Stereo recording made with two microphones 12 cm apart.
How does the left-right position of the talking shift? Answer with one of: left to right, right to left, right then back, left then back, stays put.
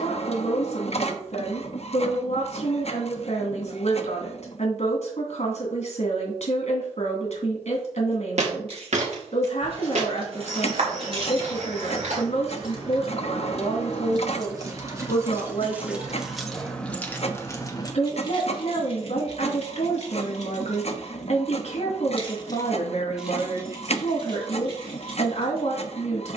stays put.